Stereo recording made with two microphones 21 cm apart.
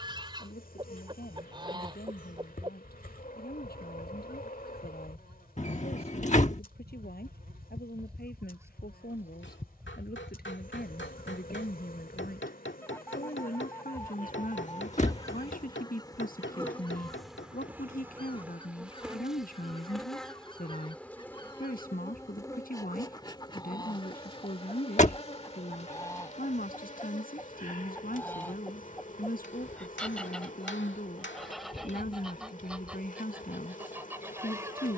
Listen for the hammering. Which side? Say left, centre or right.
left.